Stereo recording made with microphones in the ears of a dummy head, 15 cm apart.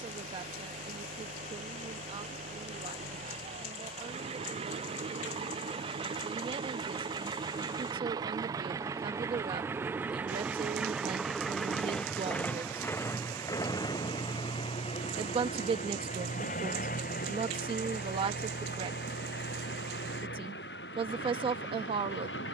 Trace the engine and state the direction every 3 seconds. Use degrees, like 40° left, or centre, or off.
50° right, 40° right, 30° right, 10° right, 20° left, 50° left, 70° left, 80° left.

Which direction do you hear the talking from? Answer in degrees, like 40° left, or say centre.
30° right.